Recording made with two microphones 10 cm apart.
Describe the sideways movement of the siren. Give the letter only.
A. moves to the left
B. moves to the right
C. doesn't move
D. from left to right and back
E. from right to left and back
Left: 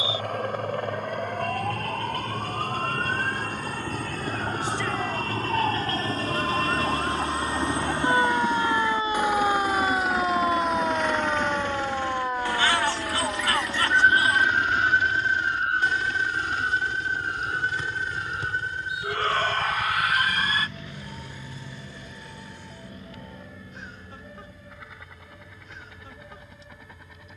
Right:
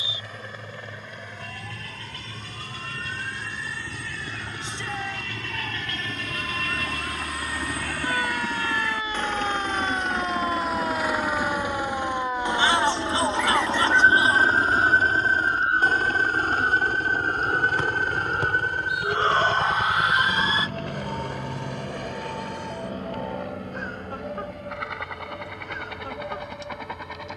B.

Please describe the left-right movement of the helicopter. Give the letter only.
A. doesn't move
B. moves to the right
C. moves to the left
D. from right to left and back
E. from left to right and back
B.